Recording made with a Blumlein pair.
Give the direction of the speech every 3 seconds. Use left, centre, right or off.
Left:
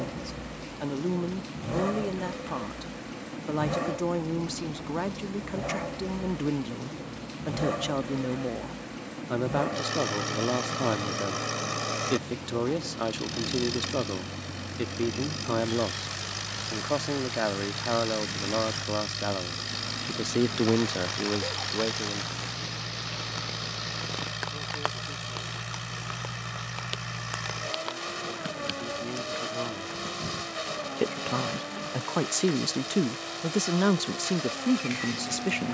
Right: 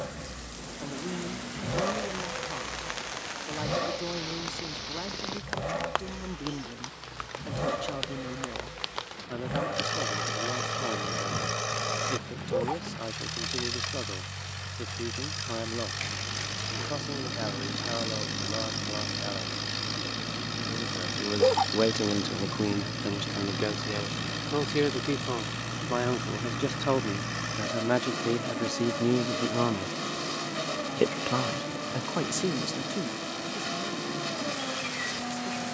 left, left, left, left, left, left, left, right, right, right, centre, left.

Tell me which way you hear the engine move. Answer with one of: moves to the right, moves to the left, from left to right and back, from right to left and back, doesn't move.
doesn't move.